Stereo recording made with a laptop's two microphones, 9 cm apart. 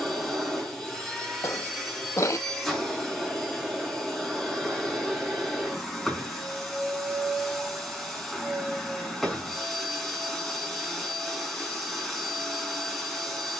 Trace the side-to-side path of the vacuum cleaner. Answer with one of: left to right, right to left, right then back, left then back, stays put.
stays put.